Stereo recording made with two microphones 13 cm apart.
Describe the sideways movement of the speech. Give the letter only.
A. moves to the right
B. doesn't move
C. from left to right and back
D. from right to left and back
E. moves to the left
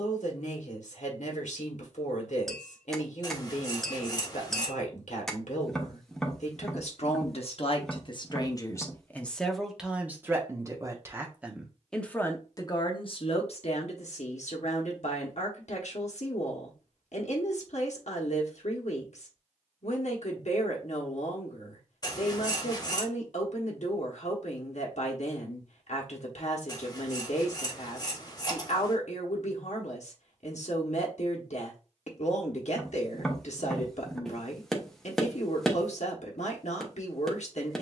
C.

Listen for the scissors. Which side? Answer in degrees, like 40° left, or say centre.
30° left.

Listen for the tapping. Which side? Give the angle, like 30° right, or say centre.
centre.